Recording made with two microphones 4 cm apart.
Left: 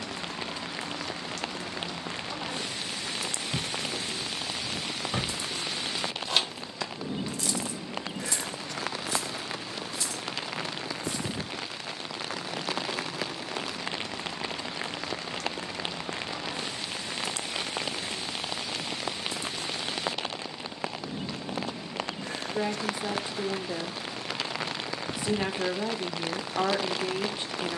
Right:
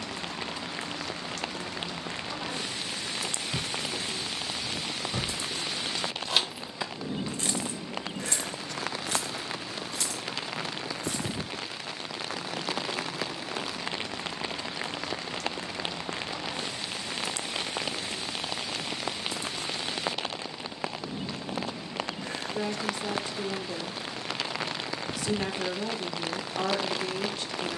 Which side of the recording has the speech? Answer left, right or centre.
left.